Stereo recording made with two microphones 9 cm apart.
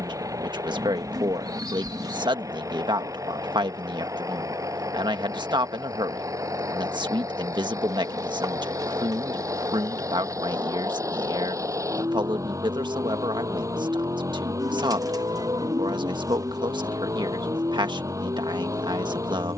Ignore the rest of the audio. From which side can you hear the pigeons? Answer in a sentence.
In this clip you hear the pigeons on the right.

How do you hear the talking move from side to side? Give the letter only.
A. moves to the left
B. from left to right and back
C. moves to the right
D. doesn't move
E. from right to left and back
D.